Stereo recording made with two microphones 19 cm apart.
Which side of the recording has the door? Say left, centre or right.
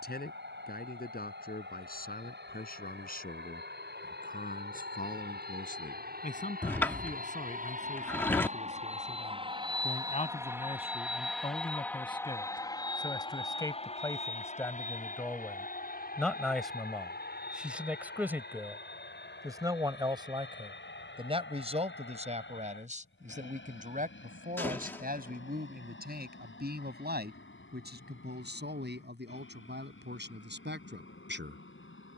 centre.